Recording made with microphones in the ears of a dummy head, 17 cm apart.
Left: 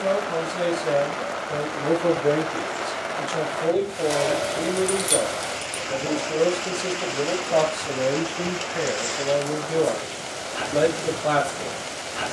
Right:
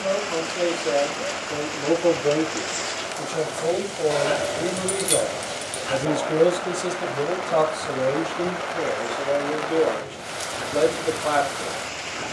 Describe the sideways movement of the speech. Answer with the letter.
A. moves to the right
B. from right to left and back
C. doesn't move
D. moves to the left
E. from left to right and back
E.